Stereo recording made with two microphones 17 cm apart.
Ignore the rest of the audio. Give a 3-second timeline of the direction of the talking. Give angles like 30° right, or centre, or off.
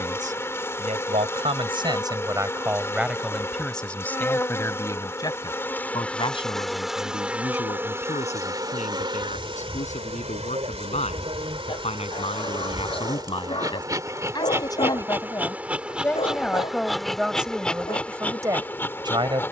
30° right, 10° left, 40° left, 40° left, 30° left, centre, 20° right.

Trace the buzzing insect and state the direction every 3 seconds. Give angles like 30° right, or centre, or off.
20° left, 10° left, 10° right, 30° right, 20° right, centre, 10° left.